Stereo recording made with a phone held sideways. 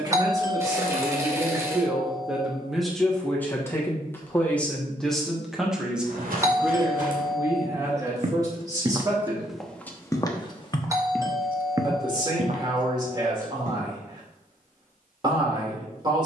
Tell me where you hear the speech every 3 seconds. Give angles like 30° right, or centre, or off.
20° right, 10° left, 20° right, 30° right, 30° right, 30° right.